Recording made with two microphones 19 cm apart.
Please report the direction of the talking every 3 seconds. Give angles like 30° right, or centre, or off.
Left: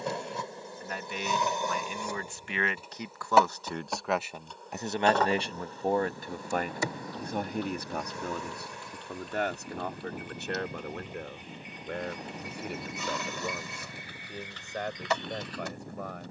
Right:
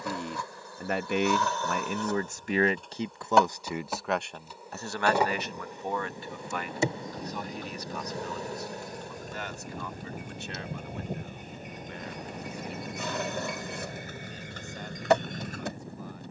50° right, 10° left, 50° left, 60° left, 70° left, 70° left.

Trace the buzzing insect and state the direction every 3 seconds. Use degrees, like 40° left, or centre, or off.
20° left, 10° right, 30° right, 50° right, 50° right, 50° right.